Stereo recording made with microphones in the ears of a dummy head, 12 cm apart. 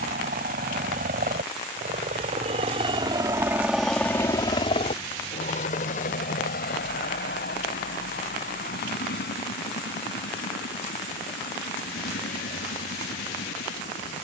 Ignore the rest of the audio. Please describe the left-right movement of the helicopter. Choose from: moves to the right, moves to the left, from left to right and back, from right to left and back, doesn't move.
moves to the left.